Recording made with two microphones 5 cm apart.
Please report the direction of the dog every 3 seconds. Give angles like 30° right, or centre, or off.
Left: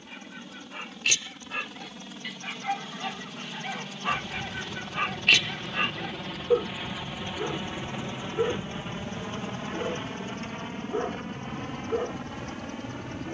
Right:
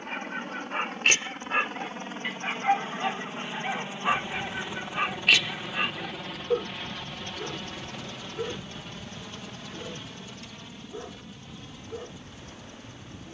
40° right, 10° right, 20° left, 40° left, 40° left.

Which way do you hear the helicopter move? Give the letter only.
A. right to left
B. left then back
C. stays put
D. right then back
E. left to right
A.